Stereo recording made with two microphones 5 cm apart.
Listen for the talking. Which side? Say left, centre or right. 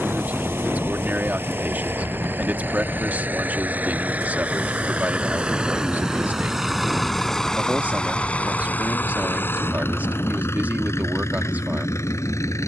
right.